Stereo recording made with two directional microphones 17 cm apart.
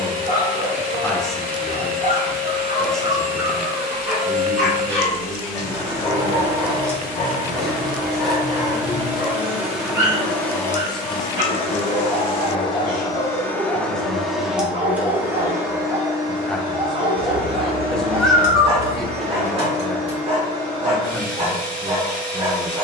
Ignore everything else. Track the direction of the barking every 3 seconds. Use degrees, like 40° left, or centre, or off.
40° right, centre, 10° left, 20° right, 30° right, 30° right, 30° right, 30° right.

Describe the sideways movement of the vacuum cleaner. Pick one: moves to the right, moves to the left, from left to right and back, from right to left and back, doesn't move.
from right to left and back.